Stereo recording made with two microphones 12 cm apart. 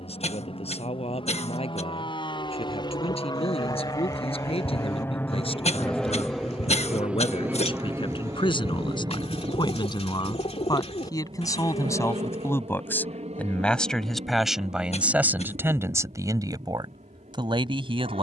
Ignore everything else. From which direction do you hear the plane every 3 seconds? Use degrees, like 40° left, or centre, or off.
50° left, 20° left, 10° right, 40° right, 60° right, 70° right.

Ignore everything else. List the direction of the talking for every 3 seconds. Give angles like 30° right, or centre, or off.
60° left, 60° left, 50° left, 40° left, 10° left, 30° right.